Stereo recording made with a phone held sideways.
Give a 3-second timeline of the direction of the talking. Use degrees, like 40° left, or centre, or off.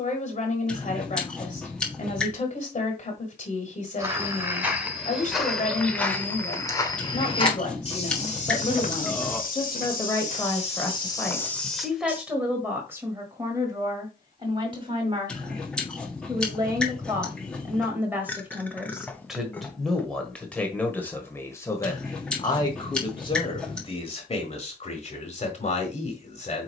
50° left, 50° left, 40° left, 20° left, 20° right, 20° right, centre, 20° left, 40° left.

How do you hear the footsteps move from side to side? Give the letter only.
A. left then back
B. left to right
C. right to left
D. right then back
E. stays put
A.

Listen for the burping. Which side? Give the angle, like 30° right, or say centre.
10° left.